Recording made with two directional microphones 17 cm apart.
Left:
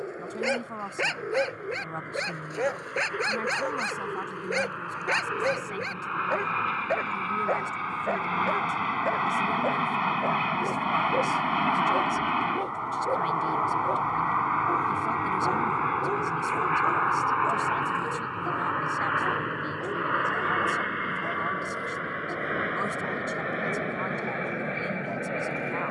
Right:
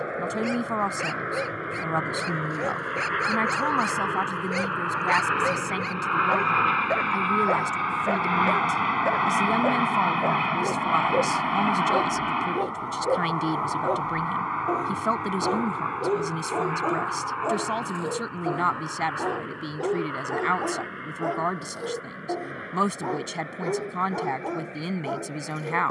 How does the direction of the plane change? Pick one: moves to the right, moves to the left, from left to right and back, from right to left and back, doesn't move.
moves to the left.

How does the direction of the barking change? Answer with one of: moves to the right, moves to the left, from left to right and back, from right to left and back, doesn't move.
moves to the right.